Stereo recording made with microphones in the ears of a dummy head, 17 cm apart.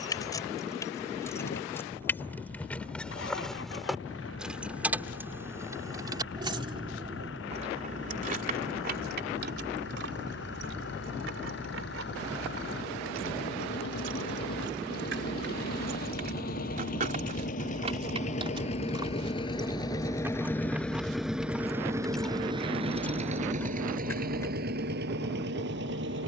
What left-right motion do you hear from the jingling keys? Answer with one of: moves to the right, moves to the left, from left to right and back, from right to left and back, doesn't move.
from left to right and back.